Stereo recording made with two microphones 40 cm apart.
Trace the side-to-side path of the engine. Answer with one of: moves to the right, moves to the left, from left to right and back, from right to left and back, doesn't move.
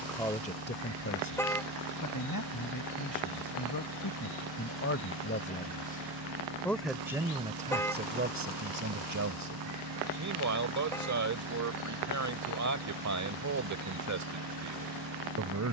doesn't move.